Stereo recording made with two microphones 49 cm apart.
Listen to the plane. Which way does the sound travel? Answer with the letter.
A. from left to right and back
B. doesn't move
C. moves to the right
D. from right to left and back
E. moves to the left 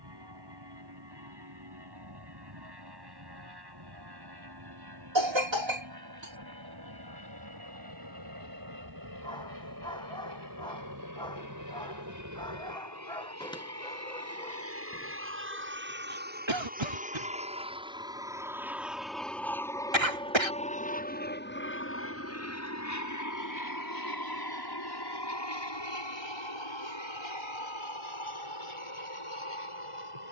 E.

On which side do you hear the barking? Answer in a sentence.
In this clip you hear the barking in the centre.